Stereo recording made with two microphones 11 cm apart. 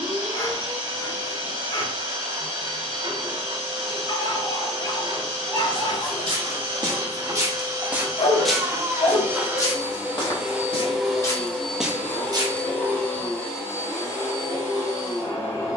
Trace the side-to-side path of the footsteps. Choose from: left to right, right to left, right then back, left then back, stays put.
left then back.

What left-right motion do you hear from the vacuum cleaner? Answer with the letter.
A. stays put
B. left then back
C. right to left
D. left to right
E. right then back
C.